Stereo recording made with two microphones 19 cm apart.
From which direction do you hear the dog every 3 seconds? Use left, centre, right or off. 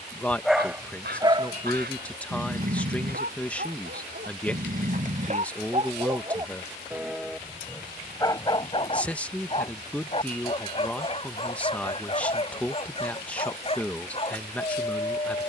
right, right, centre, left, left.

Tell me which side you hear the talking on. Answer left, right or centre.
centre.